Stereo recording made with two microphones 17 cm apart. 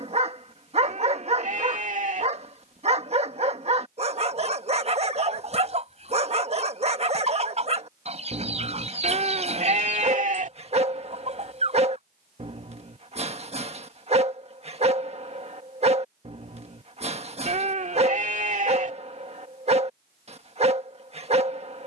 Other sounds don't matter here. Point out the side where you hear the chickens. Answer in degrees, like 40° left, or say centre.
40° right.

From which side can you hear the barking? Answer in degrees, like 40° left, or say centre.
40° right.